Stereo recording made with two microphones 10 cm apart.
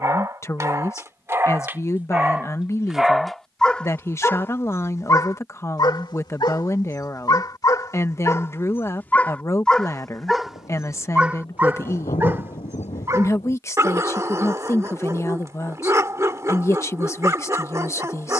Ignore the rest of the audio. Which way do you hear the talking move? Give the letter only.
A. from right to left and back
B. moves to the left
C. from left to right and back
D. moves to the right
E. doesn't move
E.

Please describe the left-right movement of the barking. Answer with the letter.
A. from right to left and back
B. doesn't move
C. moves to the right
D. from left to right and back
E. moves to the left
A.